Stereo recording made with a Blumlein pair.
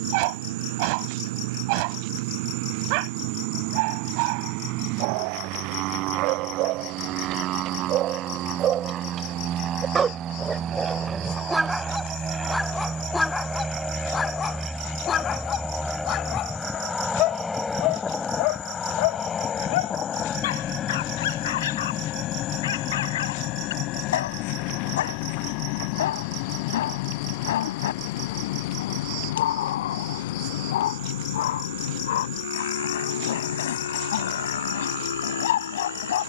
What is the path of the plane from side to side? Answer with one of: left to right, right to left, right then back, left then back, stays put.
right to left.